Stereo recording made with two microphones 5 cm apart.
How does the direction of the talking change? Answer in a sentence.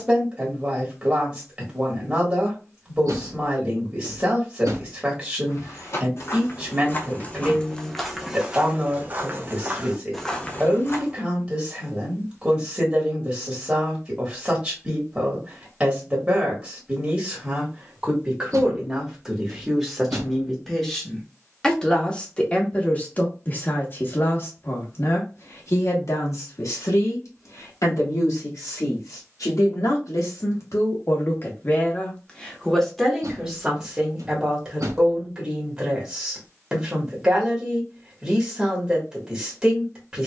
In this clip you hear the talking move from right to left and back again.